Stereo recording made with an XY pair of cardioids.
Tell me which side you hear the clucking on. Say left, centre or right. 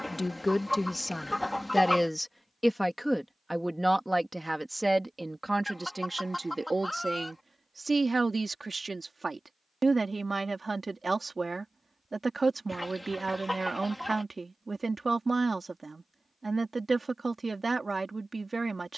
centre.